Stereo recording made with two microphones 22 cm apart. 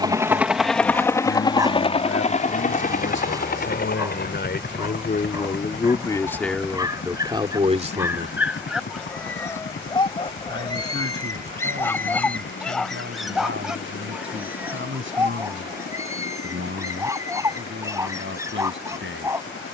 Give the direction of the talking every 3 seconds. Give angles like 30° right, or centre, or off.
70° left, 50° left, 10° right, 60° right, 70° right, 70° right, 70° right.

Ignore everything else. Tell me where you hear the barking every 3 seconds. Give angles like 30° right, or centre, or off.
20° right, 20° right, 10° right, 20° left, centre, 10° right, 10° right.